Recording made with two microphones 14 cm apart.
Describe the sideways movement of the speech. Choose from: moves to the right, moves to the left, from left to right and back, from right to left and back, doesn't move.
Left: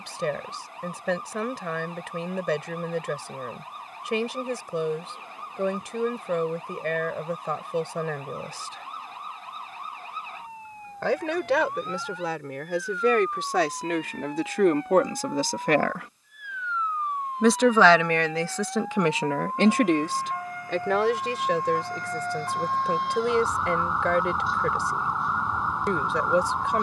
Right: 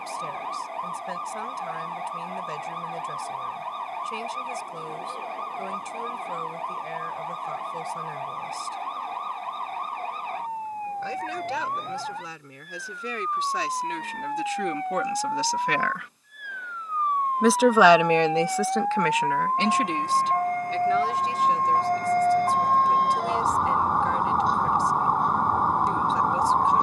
from left to right and back.